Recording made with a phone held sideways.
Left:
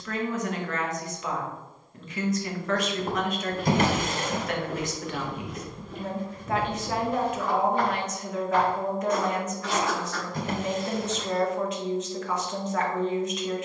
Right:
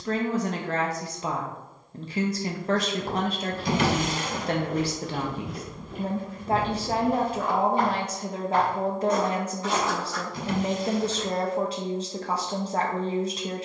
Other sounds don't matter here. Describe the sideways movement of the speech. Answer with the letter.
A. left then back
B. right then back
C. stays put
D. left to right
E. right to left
C.